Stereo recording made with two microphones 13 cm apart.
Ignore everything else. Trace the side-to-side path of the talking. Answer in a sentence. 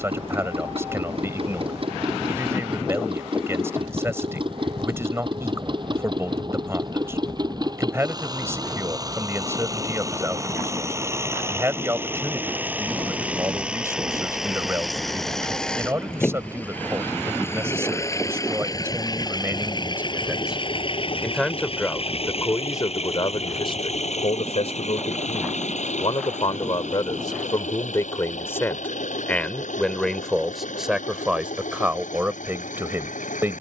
In this clip you hear the talking move from right to left and back again.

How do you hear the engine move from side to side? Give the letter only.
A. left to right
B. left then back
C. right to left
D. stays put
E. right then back
C.